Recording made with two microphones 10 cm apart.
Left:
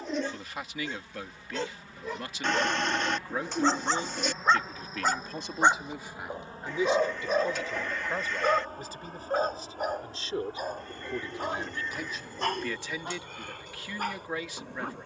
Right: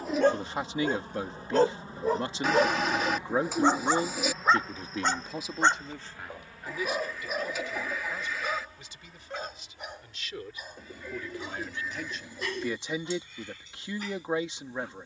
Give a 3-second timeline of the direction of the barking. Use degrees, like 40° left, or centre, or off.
50° right, centre, 30° left, 50° left, 50° left.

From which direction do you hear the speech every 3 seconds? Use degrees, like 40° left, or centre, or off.
30° right, 20° right, 30° left, 30° left, 20° right.